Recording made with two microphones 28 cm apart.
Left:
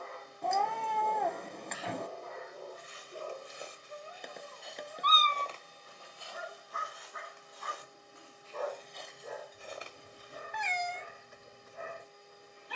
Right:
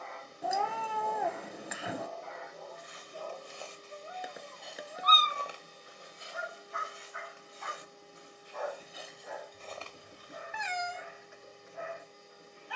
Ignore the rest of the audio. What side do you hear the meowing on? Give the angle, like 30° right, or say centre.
10° right.